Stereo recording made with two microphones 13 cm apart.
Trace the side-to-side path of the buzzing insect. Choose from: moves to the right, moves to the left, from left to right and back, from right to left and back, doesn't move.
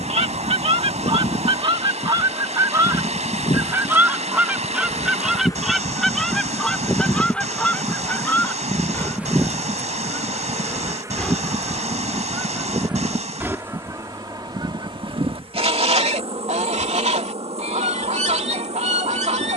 moves to the right.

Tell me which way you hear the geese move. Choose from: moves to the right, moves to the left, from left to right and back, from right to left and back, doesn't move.
from right to left and back.